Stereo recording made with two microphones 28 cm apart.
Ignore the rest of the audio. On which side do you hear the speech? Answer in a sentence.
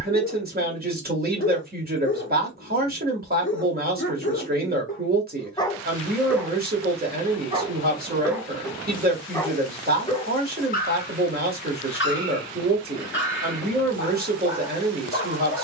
You can hear the speech on the right.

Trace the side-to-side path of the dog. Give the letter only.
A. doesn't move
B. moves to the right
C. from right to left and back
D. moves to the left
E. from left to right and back
E.